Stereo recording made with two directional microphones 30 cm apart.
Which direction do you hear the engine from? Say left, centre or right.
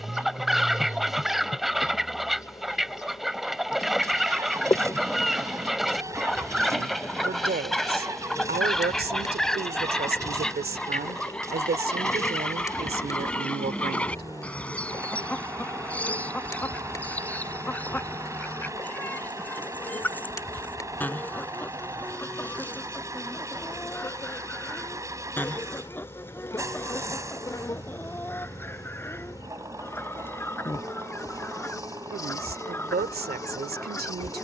centre.